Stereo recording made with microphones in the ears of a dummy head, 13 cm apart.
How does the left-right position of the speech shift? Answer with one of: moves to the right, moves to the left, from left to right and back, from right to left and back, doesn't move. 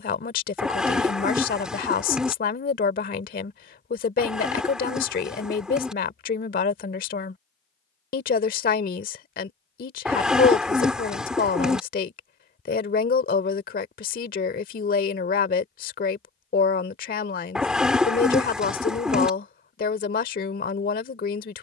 doesn't move.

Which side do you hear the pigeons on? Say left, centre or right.
centre.